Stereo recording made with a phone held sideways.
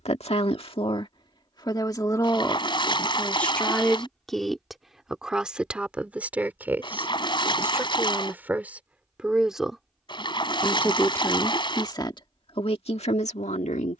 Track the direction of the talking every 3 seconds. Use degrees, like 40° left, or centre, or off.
40° left, centre, 10° right, 10° left, 50° left.